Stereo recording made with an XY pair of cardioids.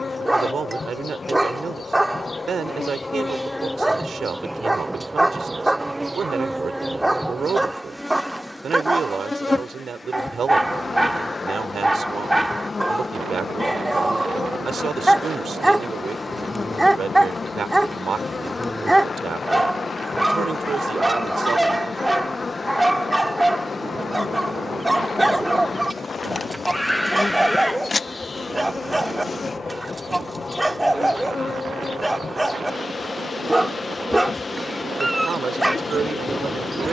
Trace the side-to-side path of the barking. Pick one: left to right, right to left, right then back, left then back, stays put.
stays put.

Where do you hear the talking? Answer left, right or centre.
right.